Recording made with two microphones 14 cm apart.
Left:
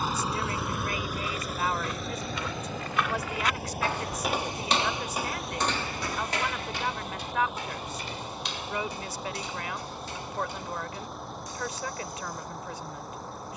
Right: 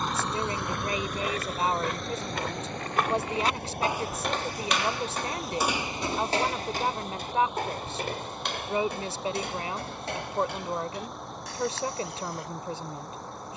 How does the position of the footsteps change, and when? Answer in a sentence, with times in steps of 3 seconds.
You can hear the footsteps on the right from 0 s, in the centre from 3 s and on the right from 6 s.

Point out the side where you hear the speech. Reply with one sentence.
In this clip you hear the speech on the right.